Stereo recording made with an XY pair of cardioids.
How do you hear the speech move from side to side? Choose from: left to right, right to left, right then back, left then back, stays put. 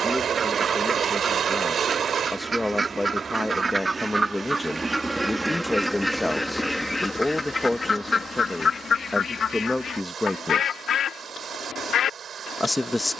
stays put.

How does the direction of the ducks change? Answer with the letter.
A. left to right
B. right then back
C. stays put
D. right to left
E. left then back
D.